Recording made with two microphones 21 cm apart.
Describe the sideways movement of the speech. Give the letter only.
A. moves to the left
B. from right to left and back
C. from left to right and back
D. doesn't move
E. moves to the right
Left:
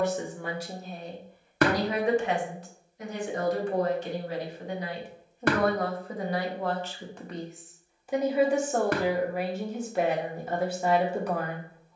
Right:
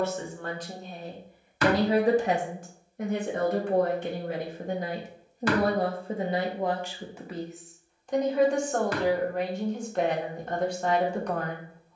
C.